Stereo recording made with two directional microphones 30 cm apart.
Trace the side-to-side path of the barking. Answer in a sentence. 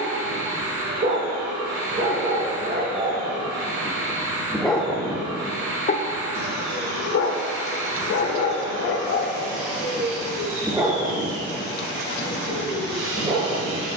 In this clip you hear the barking move from right to left and back again.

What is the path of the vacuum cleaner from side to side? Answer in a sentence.
In this clip you hear the vacuum cleaner stay put.